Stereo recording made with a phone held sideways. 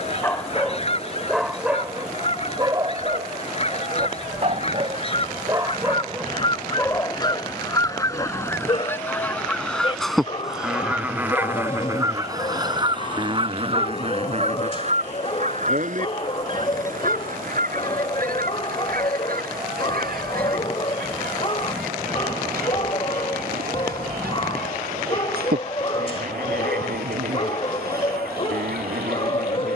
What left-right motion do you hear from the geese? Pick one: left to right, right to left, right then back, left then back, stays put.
left to right.